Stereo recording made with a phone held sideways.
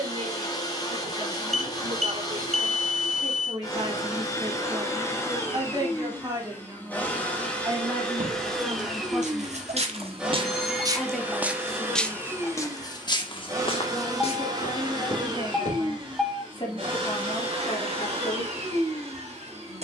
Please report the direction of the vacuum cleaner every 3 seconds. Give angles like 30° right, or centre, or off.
30° left, 20° left, 10° left, 10° right, 30° right, 40° right, 50° right.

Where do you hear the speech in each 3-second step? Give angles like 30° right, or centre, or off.
50° right, 40° right, 20° right, centre, 20° left, 40° left, 50° left.